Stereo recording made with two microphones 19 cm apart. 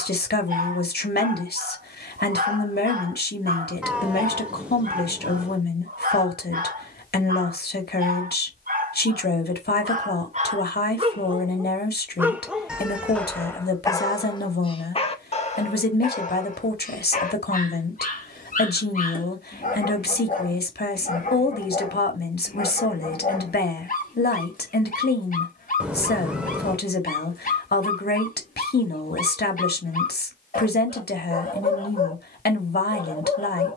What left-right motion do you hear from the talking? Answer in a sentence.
You can hear the talking stay put.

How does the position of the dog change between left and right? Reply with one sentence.
You can hear the dog go from the right side to the left.